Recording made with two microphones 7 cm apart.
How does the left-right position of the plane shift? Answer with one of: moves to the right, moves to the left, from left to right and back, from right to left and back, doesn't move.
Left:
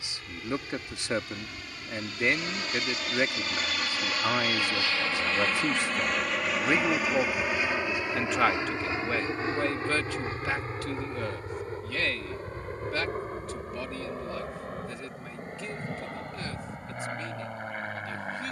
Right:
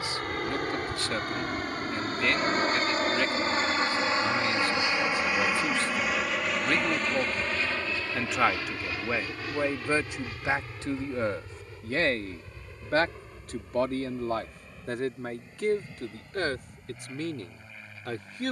moves to the left.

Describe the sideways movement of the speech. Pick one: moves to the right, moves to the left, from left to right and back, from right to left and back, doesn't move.
moves to the right.